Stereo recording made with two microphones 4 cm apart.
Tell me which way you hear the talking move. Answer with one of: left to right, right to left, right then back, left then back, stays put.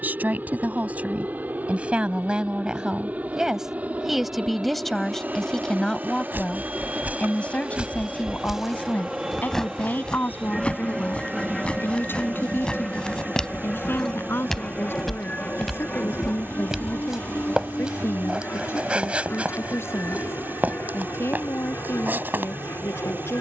right to left.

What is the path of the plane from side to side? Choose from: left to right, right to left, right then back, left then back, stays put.
right to left.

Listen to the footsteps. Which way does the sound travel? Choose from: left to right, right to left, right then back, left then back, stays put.
left then back.